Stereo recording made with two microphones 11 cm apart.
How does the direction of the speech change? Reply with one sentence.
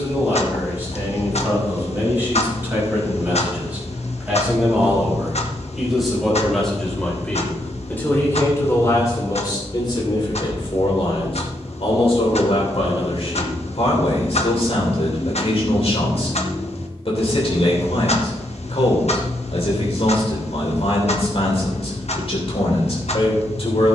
You can hear the speech go from the right side to the left.